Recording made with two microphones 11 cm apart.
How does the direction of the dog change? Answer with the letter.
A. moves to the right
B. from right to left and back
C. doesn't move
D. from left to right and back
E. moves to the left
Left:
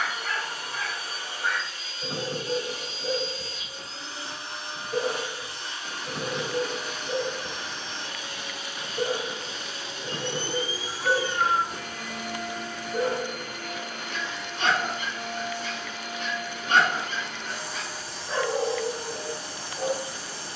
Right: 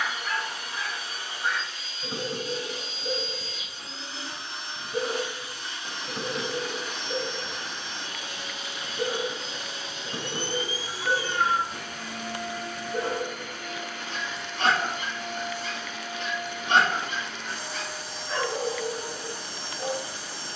D.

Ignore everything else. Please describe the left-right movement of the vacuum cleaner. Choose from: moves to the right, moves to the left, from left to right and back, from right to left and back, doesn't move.
doesn't move.